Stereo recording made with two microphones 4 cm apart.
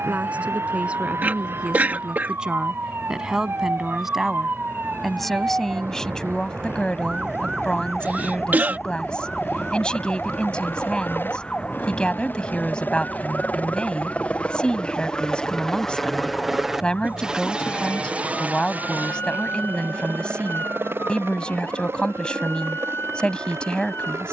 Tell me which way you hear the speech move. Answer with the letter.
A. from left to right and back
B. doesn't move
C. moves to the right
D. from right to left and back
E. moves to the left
E.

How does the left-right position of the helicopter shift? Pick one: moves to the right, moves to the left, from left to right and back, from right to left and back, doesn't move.
moves to the right.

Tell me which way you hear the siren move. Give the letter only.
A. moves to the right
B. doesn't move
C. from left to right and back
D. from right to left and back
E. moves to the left
E.